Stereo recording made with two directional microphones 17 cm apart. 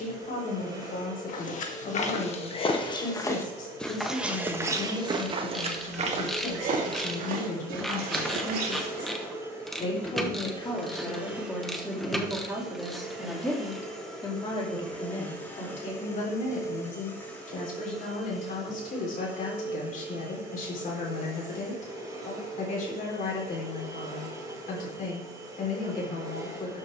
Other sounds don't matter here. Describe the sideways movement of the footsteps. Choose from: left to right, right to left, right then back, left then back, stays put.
left to right.